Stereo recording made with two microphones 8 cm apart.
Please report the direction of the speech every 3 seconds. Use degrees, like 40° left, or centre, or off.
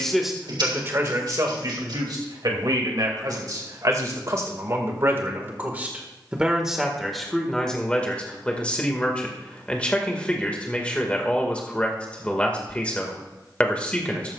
40° right, 40° right, 10° left, 10° left, 10° left.